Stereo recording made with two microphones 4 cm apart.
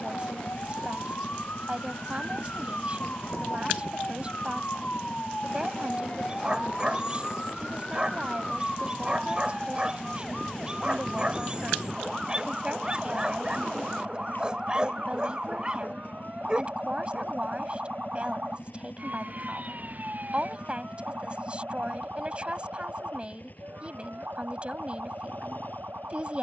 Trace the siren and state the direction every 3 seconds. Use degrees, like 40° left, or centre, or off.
50° left, 40° left, 20° left, centre, 20° right, 30° right, 40° right, 50° right, 50° right.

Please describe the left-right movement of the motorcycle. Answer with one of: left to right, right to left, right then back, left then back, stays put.
stays put.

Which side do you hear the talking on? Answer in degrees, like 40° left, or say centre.
30° right.